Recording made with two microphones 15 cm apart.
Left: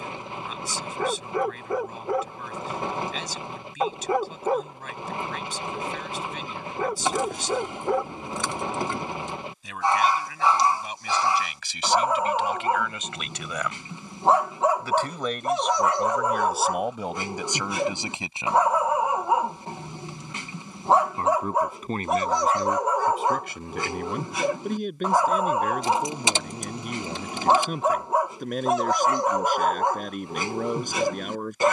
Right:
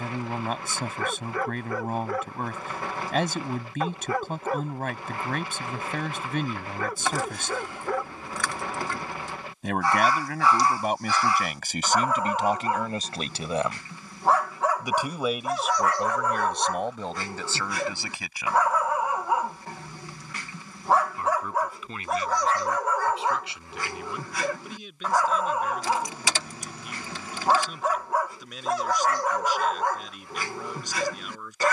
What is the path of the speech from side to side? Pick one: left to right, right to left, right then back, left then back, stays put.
right to left.